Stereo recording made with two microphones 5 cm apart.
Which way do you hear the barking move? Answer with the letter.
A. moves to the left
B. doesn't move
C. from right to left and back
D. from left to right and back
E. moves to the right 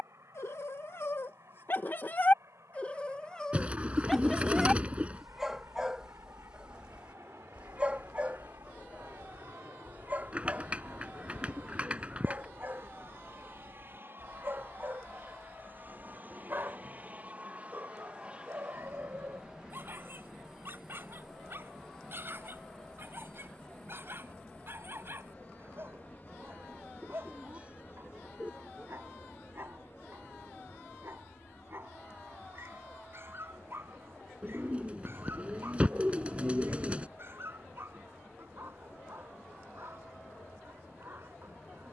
E.